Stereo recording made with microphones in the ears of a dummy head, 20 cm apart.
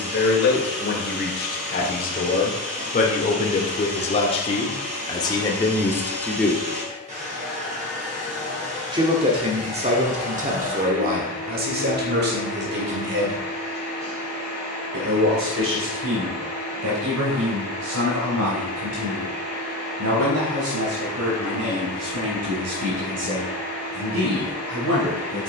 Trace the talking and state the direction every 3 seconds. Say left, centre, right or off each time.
left, left, centre, right, right, right, right, right, right.